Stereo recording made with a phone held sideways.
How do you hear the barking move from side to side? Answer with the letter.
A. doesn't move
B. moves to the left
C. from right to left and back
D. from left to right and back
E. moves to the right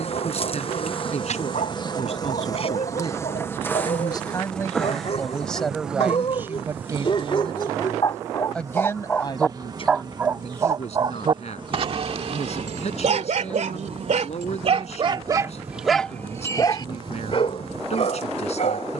D.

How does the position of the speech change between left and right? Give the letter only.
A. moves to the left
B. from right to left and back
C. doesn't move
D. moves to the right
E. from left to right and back
E.